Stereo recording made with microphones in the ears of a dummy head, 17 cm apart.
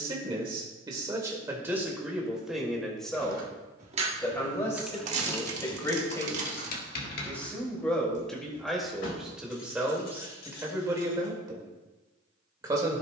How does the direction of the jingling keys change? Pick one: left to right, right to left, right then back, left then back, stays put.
right to left.